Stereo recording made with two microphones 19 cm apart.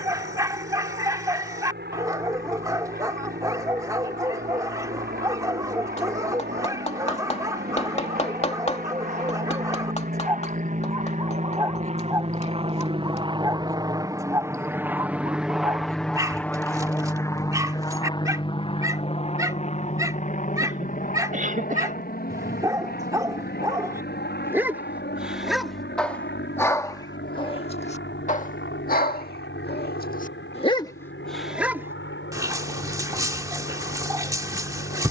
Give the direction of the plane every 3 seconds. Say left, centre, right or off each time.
right, right, right, right, right, centre, left, left, left, left, left, left.